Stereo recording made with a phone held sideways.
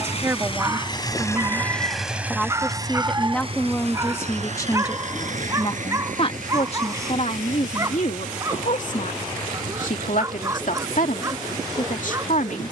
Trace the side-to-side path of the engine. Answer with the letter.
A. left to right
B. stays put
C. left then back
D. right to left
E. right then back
A.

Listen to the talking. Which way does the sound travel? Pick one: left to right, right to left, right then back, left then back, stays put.
right to left.